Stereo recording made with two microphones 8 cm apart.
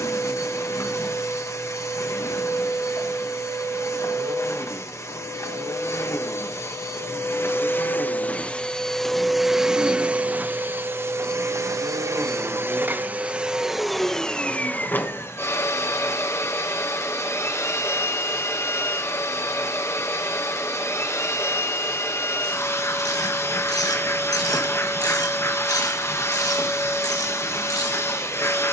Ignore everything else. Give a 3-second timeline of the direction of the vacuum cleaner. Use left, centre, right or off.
left, left, left, right, centre, left, left, left, left, left.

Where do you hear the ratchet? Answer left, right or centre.
left.